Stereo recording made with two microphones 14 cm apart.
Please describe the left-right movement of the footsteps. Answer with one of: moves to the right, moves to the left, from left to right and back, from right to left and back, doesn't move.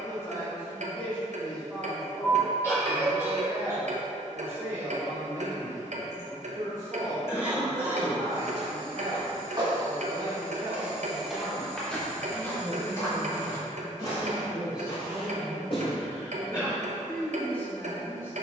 moves to the left.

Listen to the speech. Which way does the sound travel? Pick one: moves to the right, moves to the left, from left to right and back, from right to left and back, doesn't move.
from left to right and back.